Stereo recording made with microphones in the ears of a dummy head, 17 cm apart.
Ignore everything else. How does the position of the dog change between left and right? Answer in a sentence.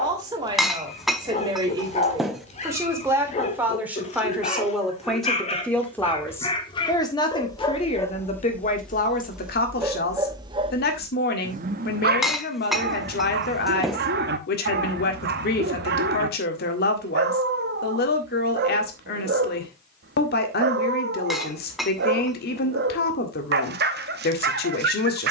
You can hear the dog move from left to right.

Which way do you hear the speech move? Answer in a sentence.
In this clip you hear the speech move from right to left.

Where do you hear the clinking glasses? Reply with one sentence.
You can hear the clinking glasses in the centre.